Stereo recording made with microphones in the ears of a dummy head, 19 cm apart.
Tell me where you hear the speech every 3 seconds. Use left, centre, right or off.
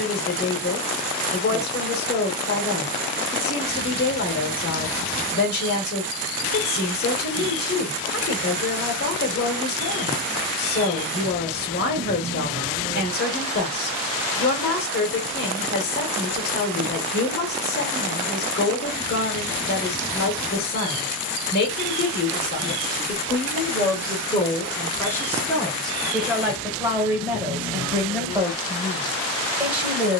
left, left, left, left, left, left, left, left, centre, centre.